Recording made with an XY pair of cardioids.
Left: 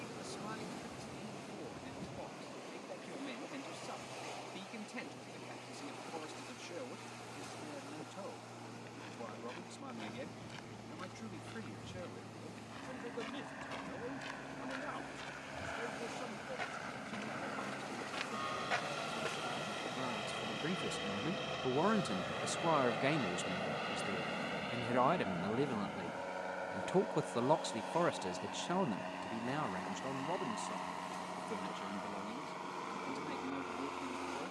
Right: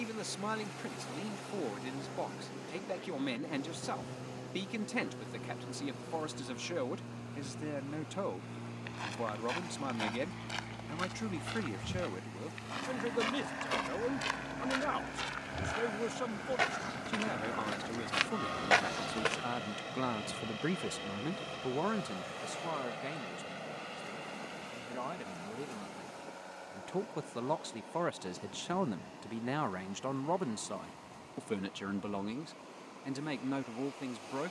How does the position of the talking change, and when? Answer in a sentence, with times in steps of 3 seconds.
In this clip you hear the talking on the right from 0 s, on the left from 21 s, in the centre from 27 s and on the right from 30 s.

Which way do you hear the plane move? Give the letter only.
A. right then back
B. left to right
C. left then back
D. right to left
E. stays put
D.